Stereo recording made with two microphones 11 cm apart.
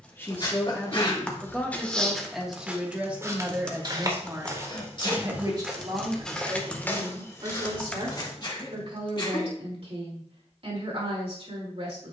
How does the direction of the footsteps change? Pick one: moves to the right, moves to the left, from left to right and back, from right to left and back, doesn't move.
from left to right and back.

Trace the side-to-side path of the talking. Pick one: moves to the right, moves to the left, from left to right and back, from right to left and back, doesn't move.
moves to the right.